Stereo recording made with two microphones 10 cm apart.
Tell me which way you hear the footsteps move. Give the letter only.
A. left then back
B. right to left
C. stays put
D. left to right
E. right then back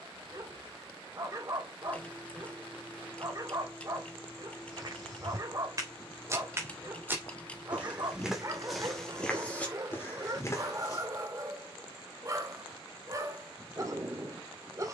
B.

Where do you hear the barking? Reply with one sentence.
You can hear the barking on the right.